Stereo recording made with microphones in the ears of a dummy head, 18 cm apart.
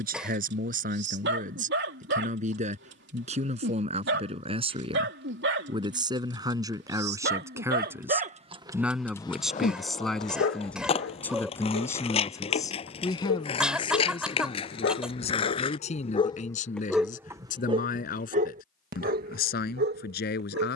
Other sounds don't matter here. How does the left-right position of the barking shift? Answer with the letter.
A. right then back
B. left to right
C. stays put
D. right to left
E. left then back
E.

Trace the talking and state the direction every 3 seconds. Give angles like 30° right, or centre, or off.
40° right, 30° right, 20° right, centre, 20° left, 40° left, 50° left.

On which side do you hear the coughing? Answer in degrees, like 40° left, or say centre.
centre.